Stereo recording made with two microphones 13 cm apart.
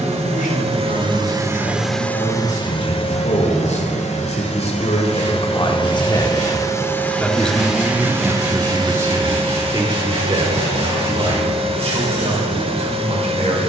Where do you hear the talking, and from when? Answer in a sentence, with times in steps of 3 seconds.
You can hear the talking on the left from 0 s, in the centre from 6 s and on the right from 9 s.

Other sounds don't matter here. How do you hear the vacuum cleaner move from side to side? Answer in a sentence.
You can hear the vacuum cleaner go left and come back.